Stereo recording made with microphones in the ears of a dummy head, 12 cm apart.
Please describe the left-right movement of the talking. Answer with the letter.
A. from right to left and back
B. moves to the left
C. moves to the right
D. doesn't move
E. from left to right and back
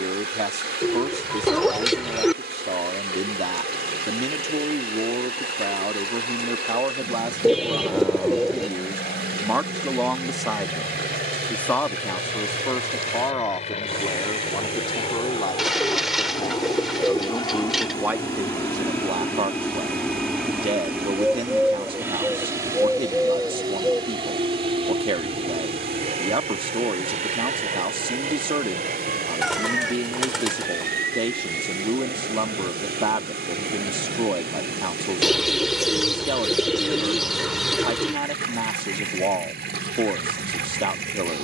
A.